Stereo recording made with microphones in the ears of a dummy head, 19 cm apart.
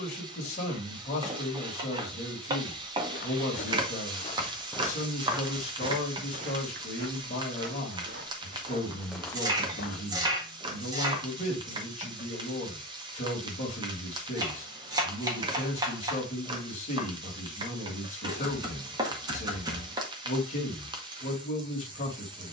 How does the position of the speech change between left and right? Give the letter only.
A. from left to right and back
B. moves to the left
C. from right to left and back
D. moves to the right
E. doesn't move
E.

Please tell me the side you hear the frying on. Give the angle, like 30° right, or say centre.
20° right.